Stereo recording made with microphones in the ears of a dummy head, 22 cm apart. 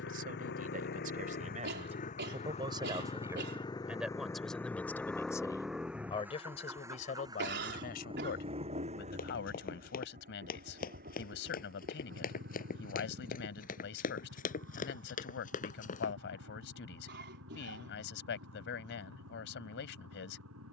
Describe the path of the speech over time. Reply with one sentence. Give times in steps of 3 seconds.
You can hear the speech on the right from 0 s, in the centre from 3 s and on the left from 6 s.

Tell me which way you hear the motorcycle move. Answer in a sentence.
In this clip you hear the motorcycle travel towards the right.